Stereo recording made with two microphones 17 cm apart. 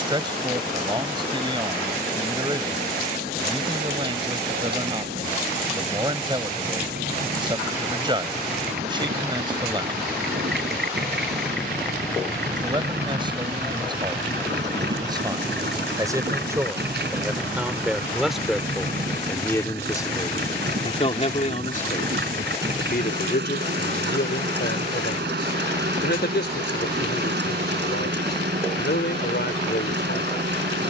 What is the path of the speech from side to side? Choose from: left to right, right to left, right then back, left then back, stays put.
right to left.